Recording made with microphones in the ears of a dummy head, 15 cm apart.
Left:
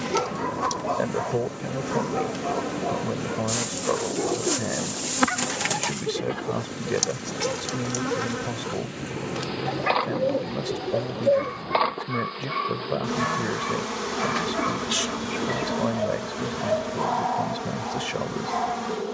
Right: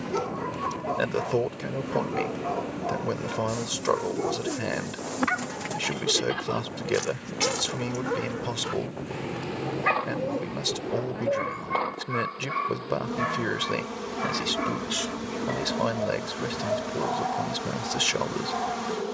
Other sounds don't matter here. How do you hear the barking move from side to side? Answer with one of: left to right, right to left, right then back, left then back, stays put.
right then back.